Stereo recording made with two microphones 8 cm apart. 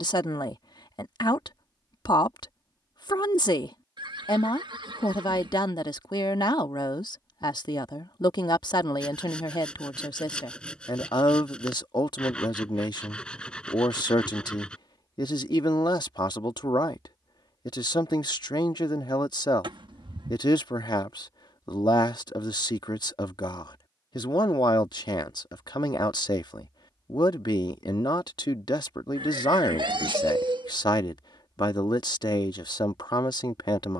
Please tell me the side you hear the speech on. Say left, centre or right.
left.